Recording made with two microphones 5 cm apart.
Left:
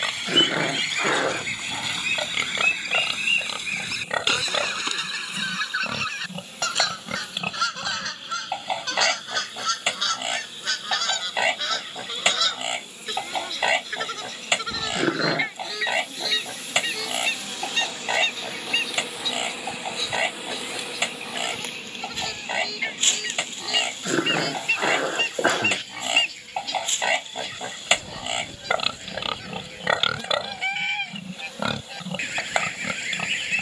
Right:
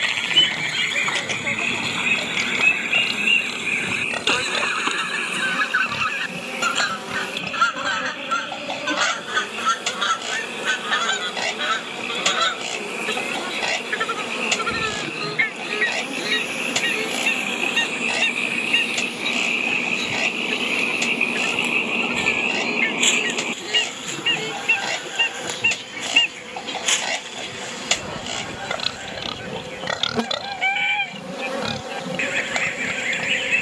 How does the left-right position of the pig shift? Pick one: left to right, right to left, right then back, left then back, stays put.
stays put.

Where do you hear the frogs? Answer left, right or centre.
right.